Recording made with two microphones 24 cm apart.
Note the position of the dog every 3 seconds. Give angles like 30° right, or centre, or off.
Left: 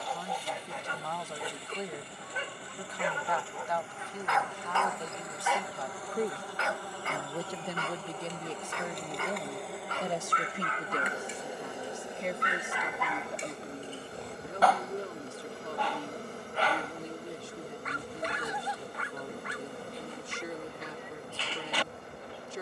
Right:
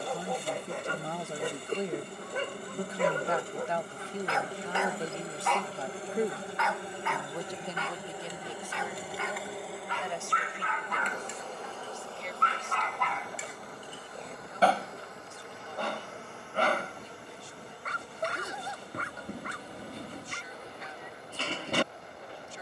50° right, 30° right, 40° left, 40° left, 10° right, 50° right, 50° right, 50° right.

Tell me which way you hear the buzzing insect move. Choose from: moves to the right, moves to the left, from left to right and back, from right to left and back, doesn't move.
moves to the left.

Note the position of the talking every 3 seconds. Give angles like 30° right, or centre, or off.
30° right, 20° right, 10° left, 40° left, 60° left, 70° left, 70° left, 70° left.